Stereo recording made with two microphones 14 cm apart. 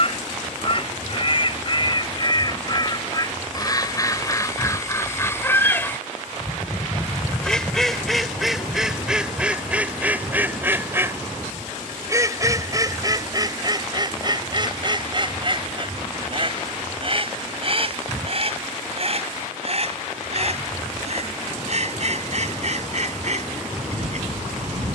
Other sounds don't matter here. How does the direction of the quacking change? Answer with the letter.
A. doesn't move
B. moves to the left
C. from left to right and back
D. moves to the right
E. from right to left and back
D.